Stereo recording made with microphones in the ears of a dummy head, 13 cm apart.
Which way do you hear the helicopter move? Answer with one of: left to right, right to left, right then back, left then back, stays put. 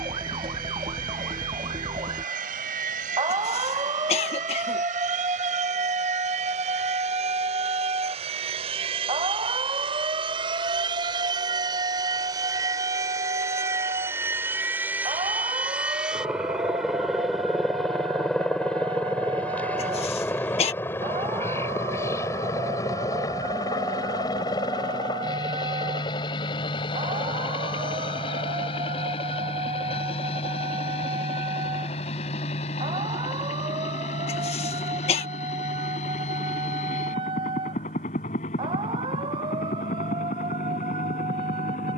right to left.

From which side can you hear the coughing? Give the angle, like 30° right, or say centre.
40° left.